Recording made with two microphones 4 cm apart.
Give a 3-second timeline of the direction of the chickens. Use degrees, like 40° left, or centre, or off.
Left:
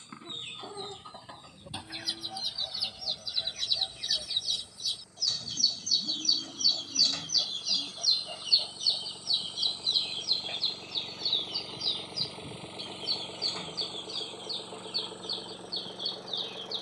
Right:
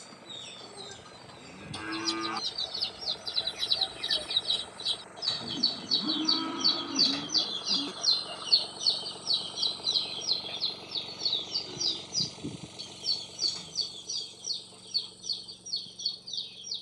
20° left, 20° right, 10° right, 20° left, 30° left, 30° left.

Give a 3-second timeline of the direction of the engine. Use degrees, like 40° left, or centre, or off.
60° right, 50° right, 40° right, 10° right, 30° left, 60° left.